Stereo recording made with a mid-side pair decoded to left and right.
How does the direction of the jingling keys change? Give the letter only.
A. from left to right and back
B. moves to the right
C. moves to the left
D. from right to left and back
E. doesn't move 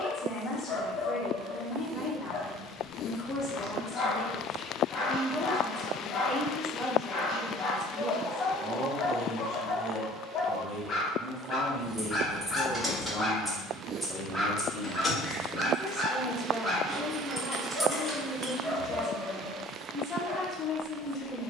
D.